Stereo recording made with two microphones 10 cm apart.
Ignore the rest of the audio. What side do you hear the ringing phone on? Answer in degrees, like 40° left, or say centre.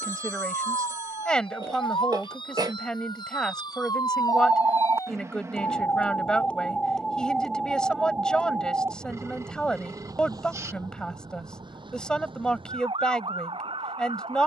30° right.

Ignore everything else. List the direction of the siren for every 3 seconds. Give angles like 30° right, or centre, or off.
60° left, 40° left, centre, 40° right, 60° right.